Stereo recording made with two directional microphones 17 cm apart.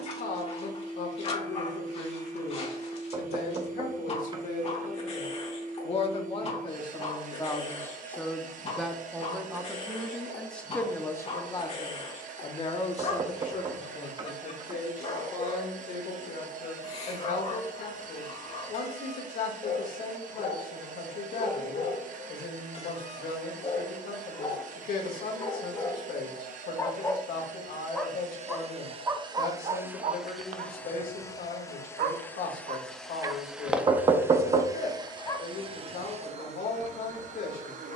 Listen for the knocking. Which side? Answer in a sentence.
In this clip you hear the knocking on the right.